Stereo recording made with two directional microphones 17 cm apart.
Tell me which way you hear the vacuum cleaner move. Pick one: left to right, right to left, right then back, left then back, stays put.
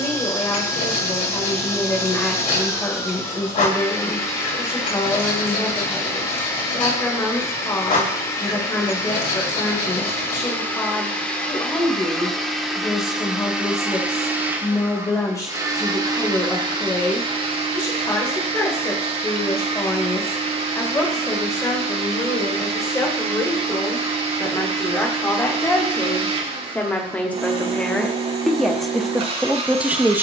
left to right.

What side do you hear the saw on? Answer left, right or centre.
left.